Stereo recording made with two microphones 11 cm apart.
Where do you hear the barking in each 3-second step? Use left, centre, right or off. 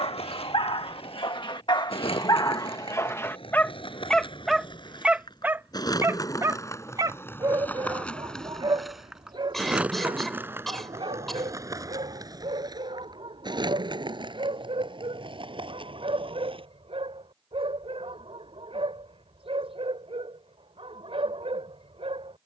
left, centre, right, right, right, right, right, right.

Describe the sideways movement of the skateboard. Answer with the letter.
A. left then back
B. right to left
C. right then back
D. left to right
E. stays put
D.